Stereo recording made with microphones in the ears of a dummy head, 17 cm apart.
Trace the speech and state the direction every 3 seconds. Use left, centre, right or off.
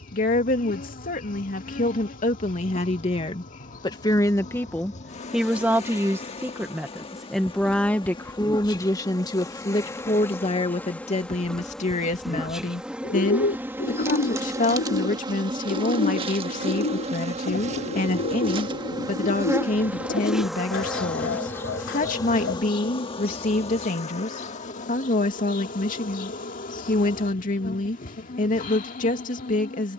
left, centre, centre, left, left, left, left, left, left, left.